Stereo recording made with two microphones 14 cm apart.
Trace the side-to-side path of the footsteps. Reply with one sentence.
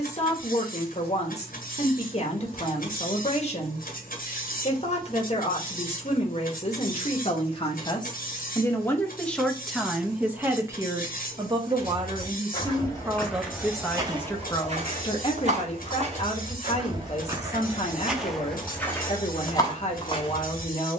You can hear the footsteps go right and come back.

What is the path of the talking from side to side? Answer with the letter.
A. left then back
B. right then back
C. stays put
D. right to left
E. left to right
B.